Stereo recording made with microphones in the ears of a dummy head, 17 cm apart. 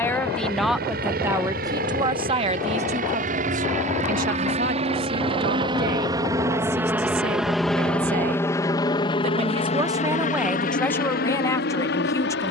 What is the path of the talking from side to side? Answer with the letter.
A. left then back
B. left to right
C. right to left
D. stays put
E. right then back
E.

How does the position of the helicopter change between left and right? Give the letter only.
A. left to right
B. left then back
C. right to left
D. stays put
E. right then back
C.